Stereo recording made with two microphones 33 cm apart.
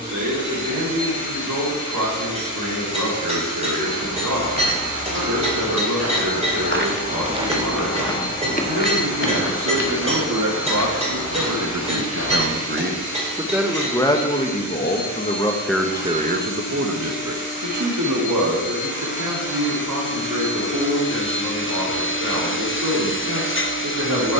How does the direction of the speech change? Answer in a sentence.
You can hear the speech move from right to left and back again.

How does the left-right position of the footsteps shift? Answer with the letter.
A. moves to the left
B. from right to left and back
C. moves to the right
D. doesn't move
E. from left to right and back
A.